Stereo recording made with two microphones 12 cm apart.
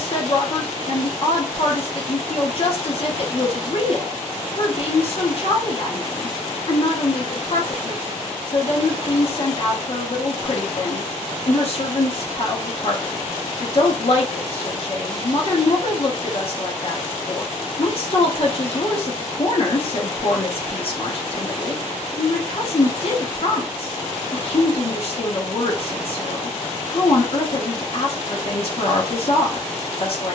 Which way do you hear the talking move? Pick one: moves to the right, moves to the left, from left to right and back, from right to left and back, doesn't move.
doesn't move.